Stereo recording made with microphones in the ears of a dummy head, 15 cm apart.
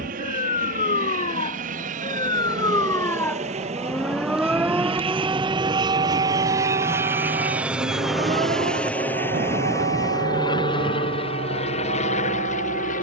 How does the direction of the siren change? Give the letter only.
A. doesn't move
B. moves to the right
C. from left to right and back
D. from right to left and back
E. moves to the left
B.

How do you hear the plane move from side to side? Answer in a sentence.
In this clip you hear the plane go from the right side to the left.